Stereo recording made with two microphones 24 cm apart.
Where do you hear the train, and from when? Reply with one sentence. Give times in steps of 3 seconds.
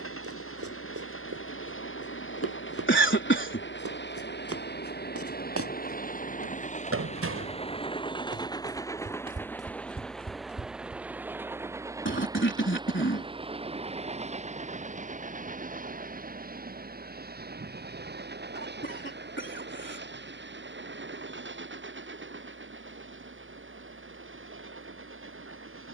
You can hear the train on the left from 0 s, in the centre from 9 s and on the right from 12 s.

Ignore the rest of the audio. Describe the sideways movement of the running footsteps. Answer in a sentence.
You can hear the running footsteps go from the right side to the left.